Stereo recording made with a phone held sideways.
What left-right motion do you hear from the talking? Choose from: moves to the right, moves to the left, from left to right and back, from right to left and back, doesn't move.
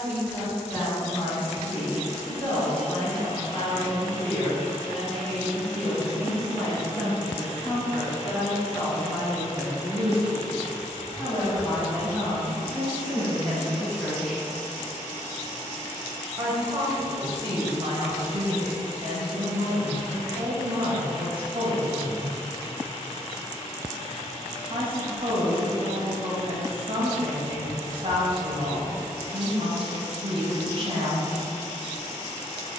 moves to the right.